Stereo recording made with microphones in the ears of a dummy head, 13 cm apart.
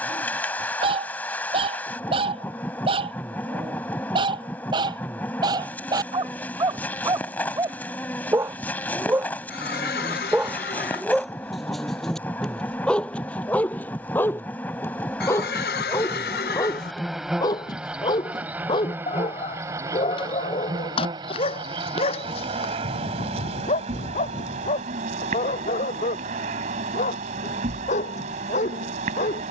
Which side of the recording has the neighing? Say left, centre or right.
left.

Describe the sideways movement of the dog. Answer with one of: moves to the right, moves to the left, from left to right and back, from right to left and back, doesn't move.
moves to the left.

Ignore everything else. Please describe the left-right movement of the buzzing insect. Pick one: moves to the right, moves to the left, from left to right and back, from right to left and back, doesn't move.
moves to the right.